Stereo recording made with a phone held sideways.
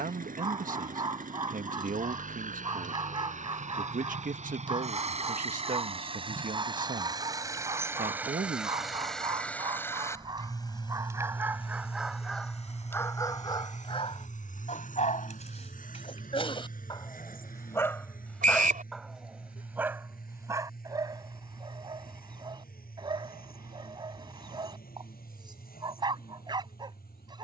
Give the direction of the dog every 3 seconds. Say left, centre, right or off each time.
right, right, right, right, left, left, centre, right, right.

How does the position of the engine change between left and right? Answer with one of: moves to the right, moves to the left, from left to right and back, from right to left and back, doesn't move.
moves to the left.